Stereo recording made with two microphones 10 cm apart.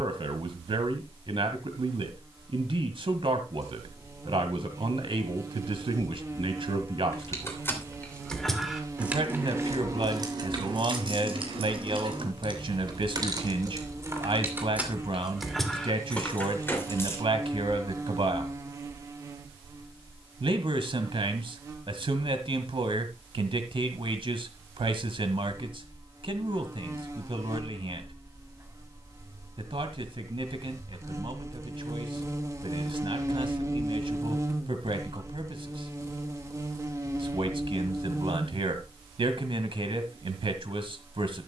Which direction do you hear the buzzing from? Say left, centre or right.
right.